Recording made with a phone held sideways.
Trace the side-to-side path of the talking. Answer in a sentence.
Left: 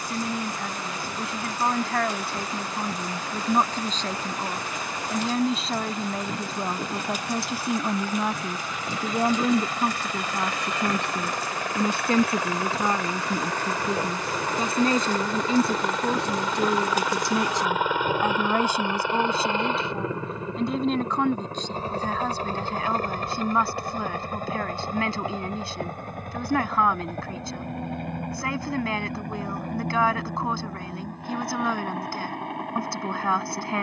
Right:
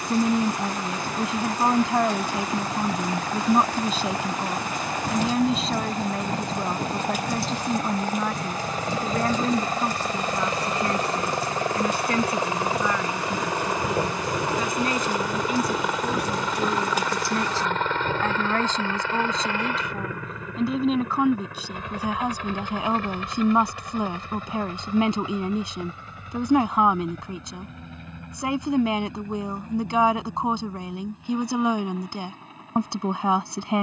In this clip you hear the talking go left and come back.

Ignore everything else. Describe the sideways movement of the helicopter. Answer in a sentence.
In this clip you hear the helicopter move to the left.